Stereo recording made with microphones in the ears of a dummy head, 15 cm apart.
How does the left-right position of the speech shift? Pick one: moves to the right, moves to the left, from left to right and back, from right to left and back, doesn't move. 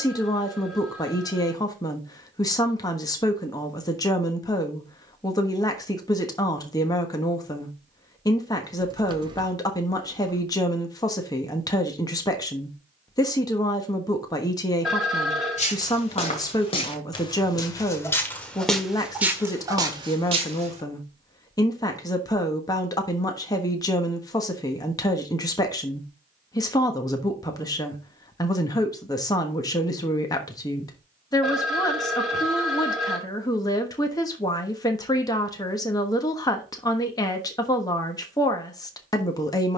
doesn't move.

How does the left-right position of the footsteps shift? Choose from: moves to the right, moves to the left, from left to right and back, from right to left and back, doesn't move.
moves to the right.